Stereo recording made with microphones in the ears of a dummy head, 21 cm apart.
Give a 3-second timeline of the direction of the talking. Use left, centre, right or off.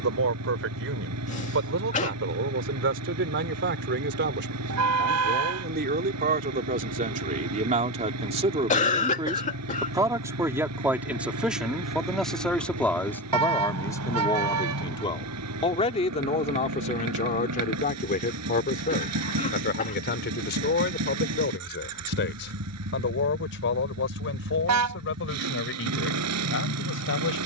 right, right, right, centre, centre, left, left, left, left.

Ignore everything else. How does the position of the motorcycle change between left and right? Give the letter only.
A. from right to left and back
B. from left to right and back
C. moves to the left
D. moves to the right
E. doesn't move
E.